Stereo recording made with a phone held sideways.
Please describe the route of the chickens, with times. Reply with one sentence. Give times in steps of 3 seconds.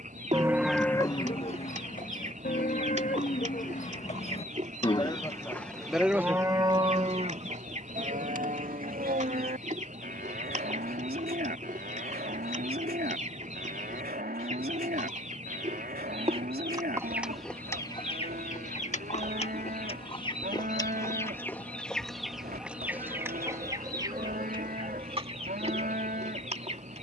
In this clip you hear the chickens on the right from 0 s, on the left from 18 s, in the centre from 21 s and on the right from 24 s.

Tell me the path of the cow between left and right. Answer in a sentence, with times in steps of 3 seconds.
You can hear the cow on the left from 0 s and on the right from 6 s.